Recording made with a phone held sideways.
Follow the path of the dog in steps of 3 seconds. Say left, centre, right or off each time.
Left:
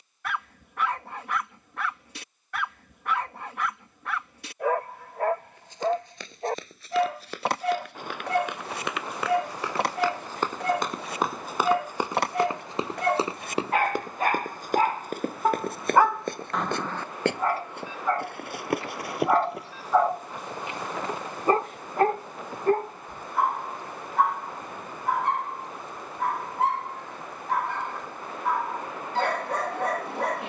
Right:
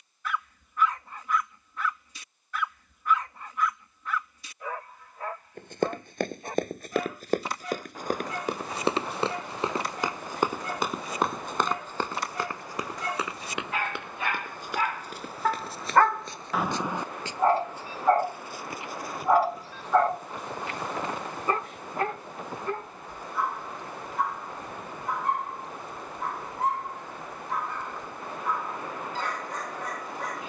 left, left, left, left, left, centre, centre, left, left, left.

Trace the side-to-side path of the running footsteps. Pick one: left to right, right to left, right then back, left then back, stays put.
right to left.